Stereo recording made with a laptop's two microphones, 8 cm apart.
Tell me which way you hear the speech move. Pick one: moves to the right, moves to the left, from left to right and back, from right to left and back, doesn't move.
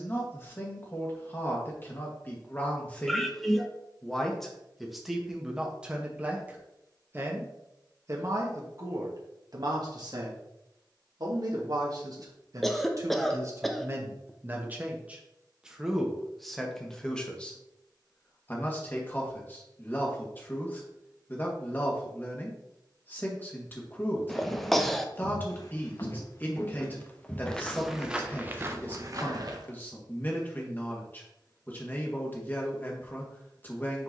from left to right and back.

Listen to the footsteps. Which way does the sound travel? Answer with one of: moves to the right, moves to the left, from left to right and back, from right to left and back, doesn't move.
moves to the right.